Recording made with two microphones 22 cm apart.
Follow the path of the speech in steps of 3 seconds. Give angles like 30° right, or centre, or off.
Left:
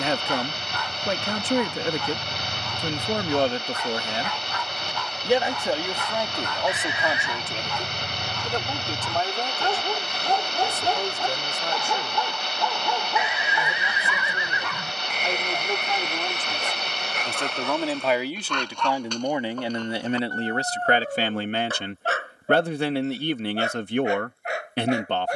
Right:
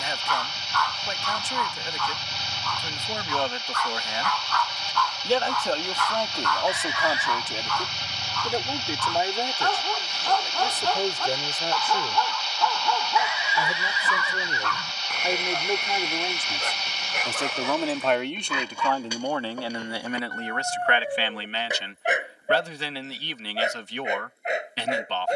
70° left, 30° left, centre, 20° right, 20° right, 10° right, 20° left, 50° left, 50° left.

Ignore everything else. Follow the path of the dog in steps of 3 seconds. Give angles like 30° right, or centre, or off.
20° left, 20° left, 20° left, 20° left, 20° left, centre, 10° right, 20° right, 20° right.